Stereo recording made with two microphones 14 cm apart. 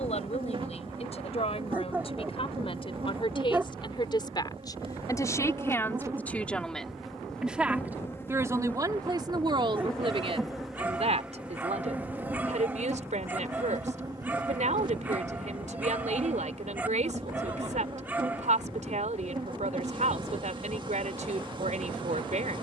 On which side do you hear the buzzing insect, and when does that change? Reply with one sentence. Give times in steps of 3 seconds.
In this clip you hear the buzzing insect on the right from 0 s, in the centre from 6 s and on the right from 12 s.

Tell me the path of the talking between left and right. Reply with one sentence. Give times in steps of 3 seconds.
In this clip you hear the talking on the left from 0 s, in the centre from 6 s and on the right from 9 s.